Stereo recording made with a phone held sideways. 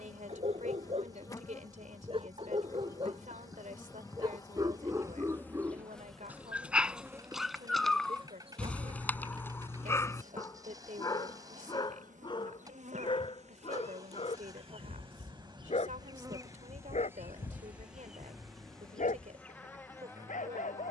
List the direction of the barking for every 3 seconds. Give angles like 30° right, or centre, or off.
40° right, 20° right, centre, 20° left, 40° left, 50° left, 60° left.